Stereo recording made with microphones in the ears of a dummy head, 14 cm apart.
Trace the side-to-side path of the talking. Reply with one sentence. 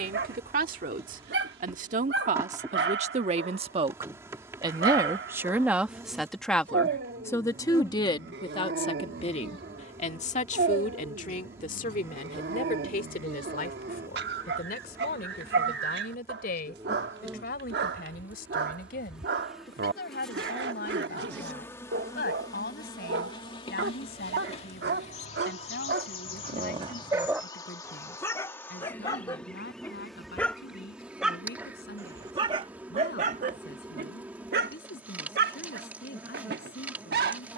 You can hear the talking move to the left.